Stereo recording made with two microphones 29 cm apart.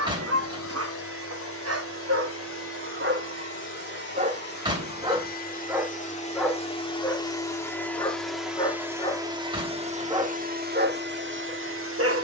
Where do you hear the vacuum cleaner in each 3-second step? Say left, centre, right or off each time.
left, left, centre, right.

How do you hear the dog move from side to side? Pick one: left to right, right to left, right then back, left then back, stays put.
left then back.